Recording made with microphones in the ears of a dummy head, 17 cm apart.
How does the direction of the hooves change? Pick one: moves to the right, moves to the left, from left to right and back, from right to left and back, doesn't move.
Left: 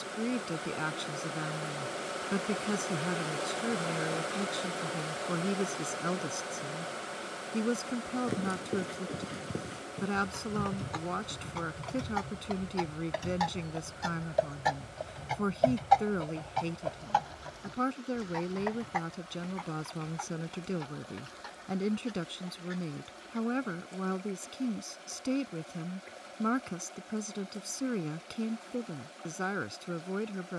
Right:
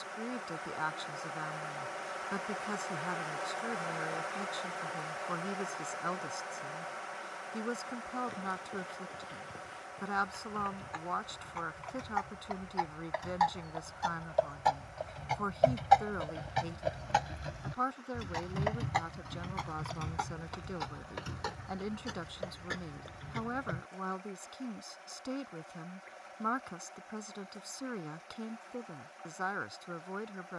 moves to the right.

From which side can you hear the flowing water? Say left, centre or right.
left.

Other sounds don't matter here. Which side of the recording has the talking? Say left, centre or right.
left.